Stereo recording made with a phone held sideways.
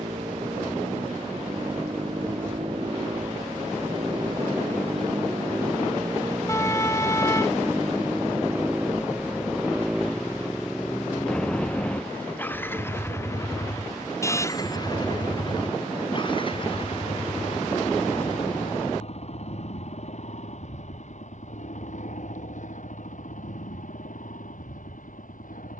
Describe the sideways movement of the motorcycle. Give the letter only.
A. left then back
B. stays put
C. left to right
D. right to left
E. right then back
D.